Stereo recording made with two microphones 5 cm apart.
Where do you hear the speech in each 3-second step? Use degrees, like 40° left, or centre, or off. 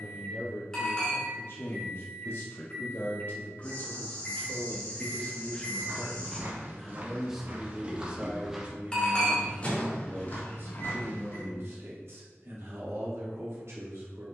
60° left, 30° left, 10° right, 40° right, 60° right.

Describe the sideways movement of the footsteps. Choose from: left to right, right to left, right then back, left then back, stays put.
right to left.